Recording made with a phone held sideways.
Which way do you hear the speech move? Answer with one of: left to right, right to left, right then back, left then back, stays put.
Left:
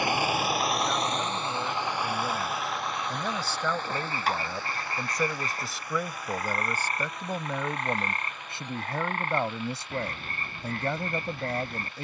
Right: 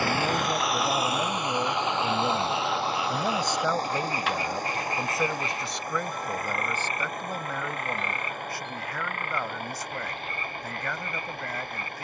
right to left.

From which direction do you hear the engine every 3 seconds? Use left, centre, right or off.
centre, right, right, right.